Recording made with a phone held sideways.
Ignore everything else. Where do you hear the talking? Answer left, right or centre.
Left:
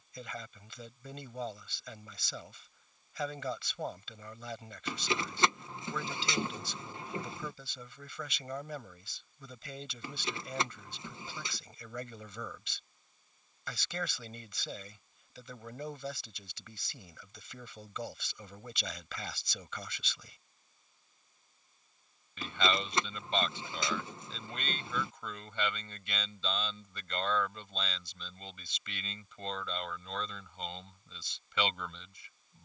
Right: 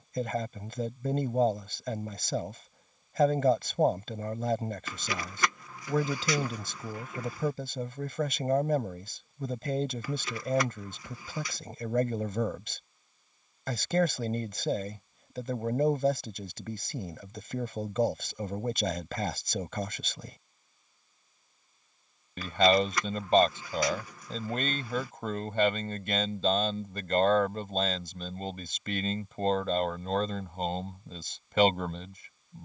right.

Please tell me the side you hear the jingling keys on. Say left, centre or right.
left.